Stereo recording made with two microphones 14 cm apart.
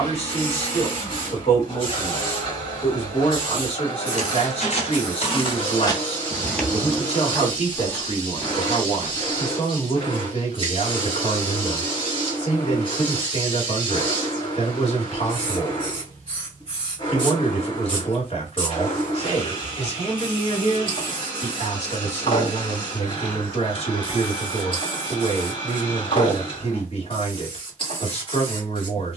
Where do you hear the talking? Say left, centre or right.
left.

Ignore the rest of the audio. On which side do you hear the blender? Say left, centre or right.
left.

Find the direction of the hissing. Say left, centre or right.
left.